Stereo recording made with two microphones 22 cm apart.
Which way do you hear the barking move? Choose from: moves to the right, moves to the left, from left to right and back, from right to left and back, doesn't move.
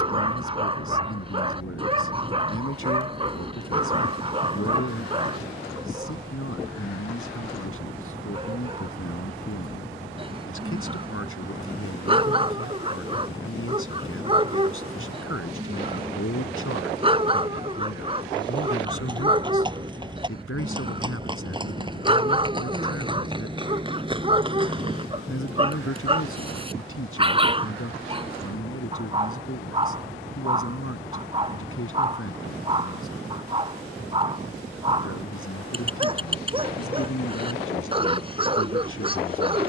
doesn't move.